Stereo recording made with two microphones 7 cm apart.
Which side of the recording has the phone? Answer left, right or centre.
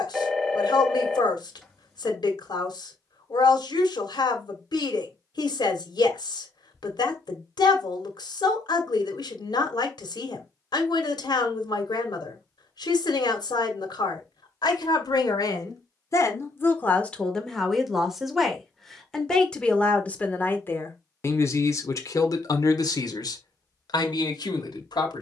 centre.